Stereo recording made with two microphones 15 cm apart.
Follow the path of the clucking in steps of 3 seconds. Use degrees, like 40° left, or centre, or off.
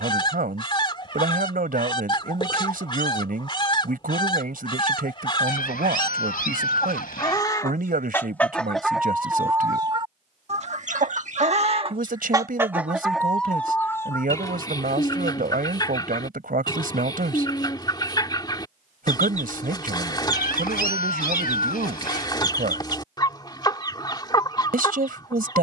30° left, 30° left, 20° left, 40° right, 10° left, 30° left, 30° left, 30° left, 30° left.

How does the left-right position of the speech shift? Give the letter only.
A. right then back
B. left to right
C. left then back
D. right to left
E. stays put
E.